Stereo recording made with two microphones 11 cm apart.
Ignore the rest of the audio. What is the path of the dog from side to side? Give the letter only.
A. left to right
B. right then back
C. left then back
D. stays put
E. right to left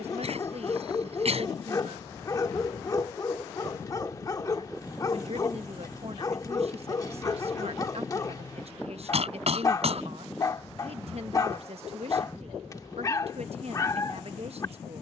D.